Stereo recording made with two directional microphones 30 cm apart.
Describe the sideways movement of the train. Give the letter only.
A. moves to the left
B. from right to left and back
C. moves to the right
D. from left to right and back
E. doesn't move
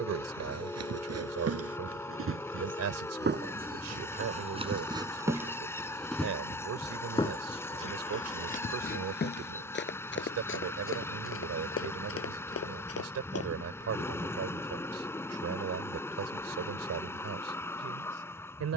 E.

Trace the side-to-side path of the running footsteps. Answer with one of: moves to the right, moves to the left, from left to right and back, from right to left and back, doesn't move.
moves to the left.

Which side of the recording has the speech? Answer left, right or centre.
right.